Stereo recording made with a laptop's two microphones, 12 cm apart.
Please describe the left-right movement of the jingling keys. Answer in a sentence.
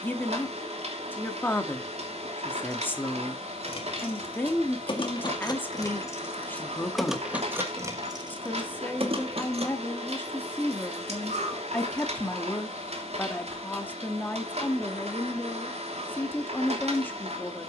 You can hear the jingling keys travel towards the right.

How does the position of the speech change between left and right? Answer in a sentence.
You can hear the speech stay put.